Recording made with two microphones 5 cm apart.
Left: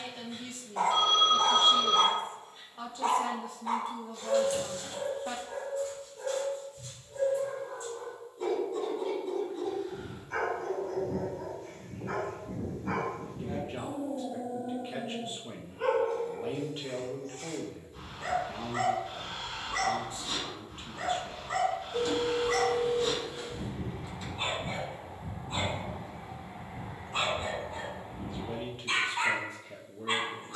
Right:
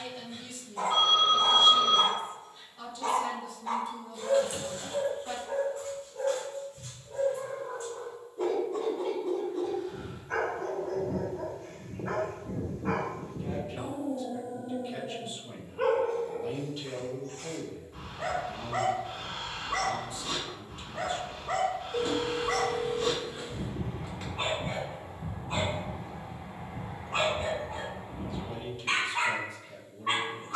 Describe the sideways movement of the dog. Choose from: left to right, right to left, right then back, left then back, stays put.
left to right.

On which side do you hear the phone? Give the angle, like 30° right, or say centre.
20° right.